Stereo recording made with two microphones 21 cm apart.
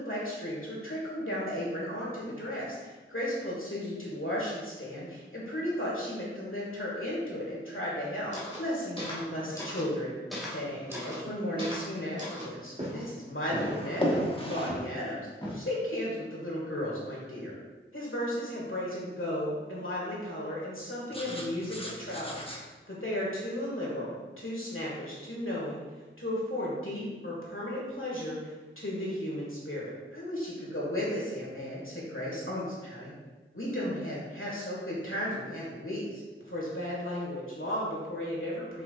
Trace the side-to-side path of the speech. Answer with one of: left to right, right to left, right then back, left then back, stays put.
stays put.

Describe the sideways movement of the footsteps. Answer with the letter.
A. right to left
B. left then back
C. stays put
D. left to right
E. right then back
E.